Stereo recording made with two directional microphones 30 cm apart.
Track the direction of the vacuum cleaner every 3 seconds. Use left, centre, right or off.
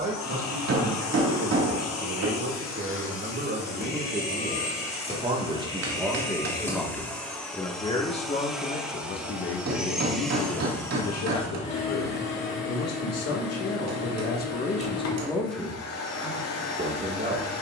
left, left, centre, centre, left, left.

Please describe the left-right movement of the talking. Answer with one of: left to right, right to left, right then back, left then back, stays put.
left then back.